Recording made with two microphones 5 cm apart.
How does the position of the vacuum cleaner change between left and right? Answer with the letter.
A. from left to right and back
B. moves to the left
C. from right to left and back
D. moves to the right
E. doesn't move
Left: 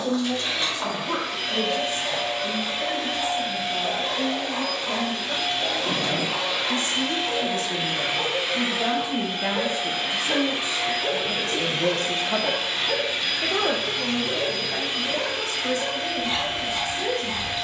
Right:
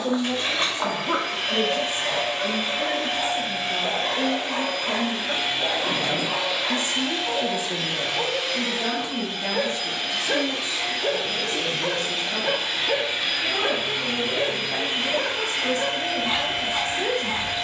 C.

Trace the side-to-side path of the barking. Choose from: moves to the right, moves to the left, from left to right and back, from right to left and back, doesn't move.
doesn't move.